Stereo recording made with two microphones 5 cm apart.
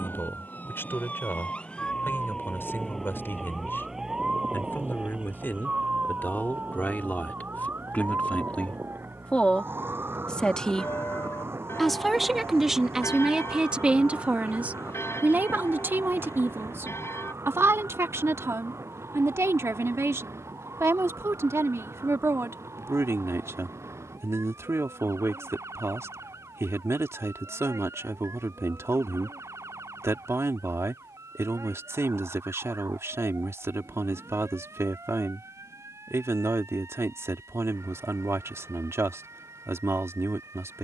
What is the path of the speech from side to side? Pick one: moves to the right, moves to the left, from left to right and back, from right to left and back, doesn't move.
moves to the right.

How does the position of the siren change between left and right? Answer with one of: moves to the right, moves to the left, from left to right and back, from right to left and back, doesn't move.
moves to the right.